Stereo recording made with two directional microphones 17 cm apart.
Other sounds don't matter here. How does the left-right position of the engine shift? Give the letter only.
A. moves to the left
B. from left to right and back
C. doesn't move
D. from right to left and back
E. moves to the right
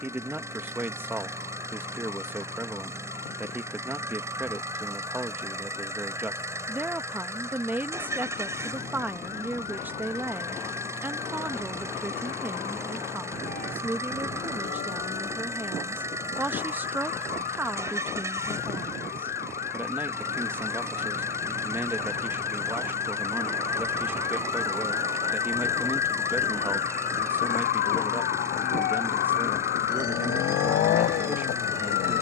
C.